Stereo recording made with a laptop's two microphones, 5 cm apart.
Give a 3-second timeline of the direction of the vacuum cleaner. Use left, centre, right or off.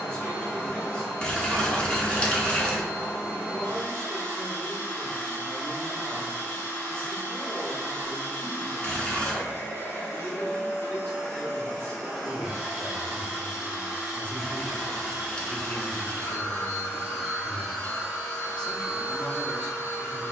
left, left, left, left, centre, centre, left.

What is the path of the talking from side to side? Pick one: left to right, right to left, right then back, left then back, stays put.
stays put.